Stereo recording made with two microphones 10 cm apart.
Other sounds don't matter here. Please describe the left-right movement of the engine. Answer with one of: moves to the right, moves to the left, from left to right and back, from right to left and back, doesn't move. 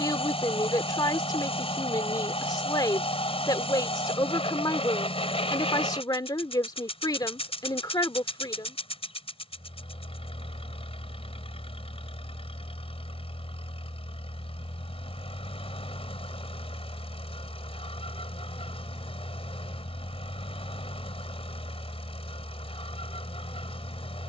doesn't move.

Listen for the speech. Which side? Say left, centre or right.
left.